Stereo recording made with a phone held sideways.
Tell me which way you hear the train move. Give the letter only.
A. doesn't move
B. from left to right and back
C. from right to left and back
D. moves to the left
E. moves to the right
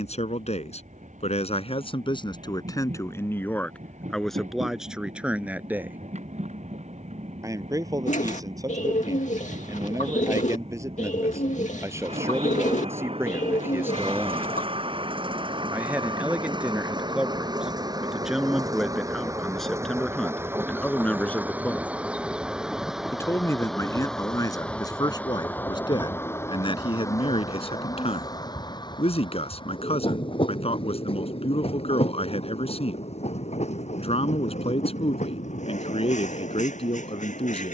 D.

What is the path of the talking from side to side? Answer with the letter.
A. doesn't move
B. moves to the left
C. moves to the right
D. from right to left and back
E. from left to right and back
E.